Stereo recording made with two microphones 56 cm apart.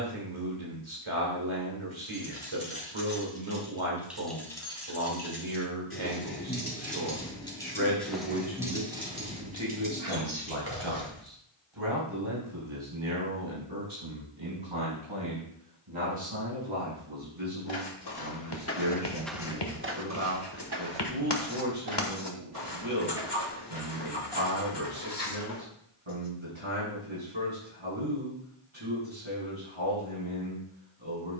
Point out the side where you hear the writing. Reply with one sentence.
You can hear the writing on the left.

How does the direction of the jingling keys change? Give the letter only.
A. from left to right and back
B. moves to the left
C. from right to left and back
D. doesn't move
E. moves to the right
C.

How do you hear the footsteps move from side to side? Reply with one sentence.
In this clip you hear the footsteps move from left to right.